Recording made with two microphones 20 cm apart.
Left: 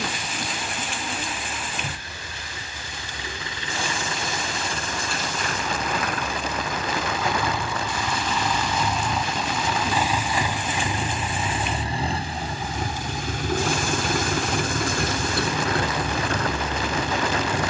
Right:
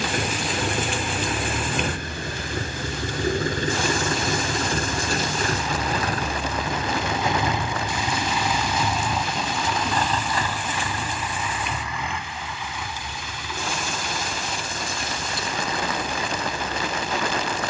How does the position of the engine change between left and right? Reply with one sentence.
In this clip you hear the engine move to the left.